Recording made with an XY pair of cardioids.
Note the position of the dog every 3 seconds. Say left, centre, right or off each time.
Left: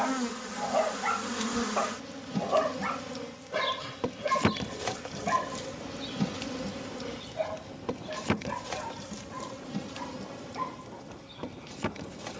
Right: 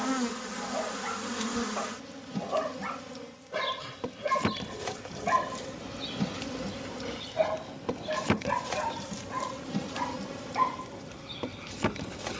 left, centre, right, right.